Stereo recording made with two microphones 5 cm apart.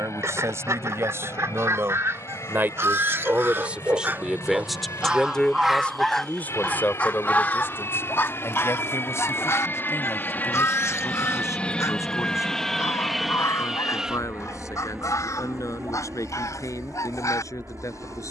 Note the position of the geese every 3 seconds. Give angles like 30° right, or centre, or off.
60° right, 30° right, 30° left, 60° left, 70° left, 80° left.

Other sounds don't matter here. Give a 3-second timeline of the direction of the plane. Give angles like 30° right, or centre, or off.
70° left, 70° left, 60° left, 30° left, centre, 40° right.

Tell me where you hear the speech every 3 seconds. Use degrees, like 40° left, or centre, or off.
50° right, 10° right, 40° left, 60° left, 70° left, 80° left.